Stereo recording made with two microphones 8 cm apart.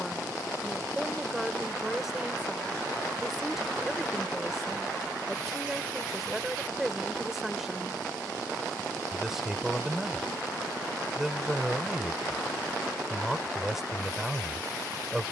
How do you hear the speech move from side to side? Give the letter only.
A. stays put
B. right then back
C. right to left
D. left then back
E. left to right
A.